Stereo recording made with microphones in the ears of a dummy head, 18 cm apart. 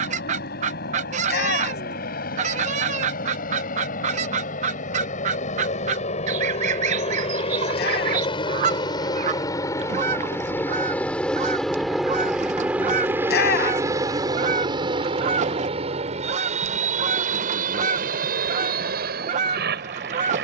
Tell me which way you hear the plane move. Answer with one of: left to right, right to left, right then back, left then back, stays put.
left to right.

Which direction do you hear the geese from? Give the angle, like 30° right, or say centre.
40° right.